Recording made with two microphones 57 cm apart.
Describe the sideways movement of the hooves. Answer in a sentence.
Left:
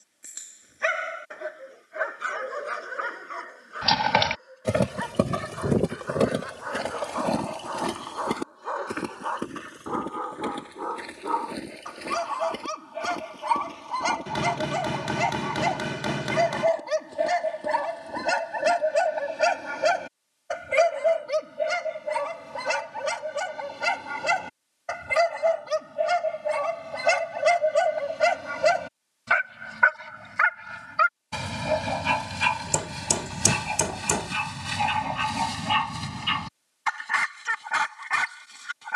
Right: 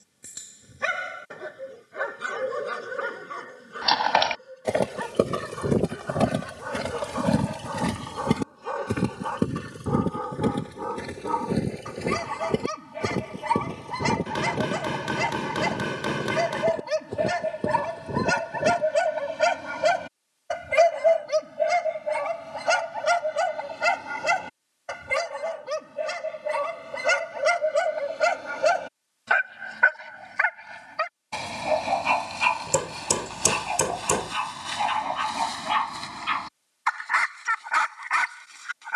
In this clip you hear the hooves travel towards the right.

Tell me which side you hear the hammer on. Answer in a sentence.
In this clip you hear the hammer in the centre.